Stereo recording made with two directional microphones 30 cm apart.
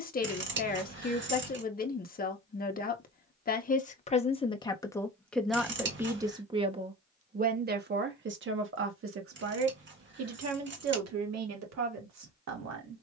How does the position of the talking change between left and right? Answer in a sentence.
In this clip you hear the talking move to the right.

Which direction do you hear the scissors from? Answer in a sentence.
In this clip you hear the scissors on the right.